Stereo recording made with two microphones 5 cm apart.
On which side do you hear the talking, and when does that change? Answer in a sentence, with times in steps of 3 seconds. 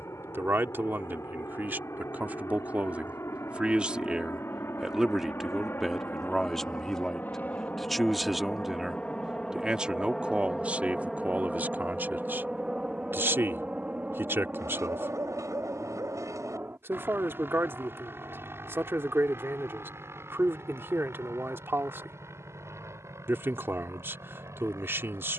In this clip you hear the talking on the right from 0 s, in the centre from 3 s and on the right from 9 s.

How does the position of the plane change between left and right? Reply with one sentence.
You can hear the plane travel towards the right.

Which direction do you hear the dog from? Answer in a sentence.
In this clip you hear the dog on the right.